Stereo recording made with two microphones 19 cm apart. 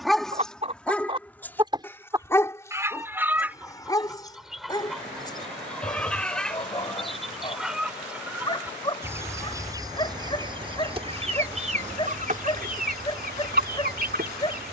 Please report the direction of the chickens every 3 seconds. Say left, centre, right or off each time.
right, centre, centre, right, right.